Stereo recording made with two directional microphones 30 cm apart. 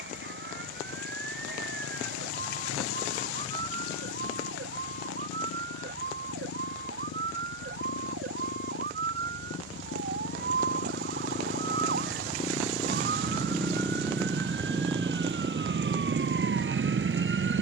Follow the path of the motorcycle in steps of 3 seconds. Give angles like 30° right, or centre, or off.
60° left, 60° left, 50° left, 40° left, 10° left, 30° right.